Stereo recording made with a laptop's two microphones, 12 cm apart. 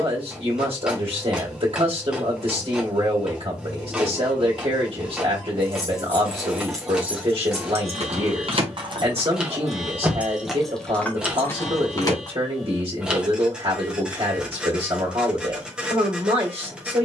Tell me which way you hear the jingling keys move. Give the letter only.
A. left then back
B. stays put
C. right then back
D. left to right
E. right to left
C.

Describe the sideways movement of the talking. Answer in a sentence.
In this clip you hear the talking stay in one place.